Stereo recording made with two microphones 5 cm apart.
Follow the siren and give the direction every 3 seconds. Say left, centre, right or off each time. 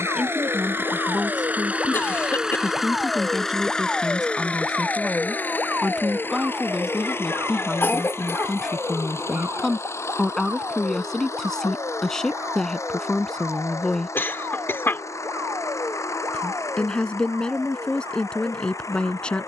left, centre, right, right, right, right, right.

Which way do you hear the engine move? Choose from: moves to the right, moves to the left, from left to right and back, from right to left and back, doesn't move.
moves to the left.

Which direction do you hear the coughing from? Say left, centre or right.
left.